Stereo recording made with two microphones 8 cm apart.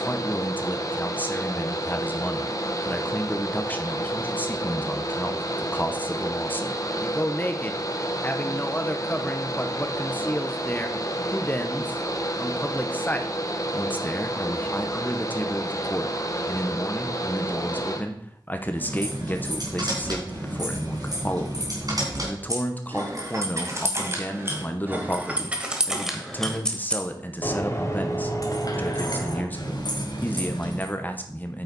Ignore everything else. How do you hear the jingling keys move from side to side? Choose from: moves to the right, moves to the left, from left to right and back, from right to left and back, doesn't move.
moves to the left.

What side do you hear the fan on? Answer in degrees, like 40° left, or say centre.
40° left.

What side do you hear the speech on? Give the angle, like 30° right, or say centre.
20° left.